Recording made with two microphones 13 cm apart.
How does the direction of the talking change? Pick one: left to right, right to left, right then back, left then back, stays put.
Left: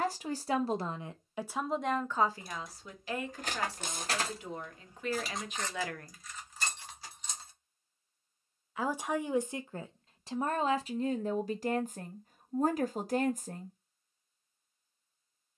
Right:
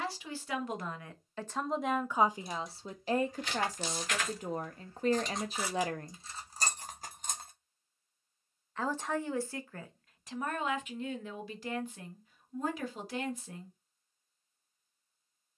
right then back.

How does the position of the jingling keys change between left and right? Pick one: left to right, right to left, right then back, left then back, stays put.
left to right.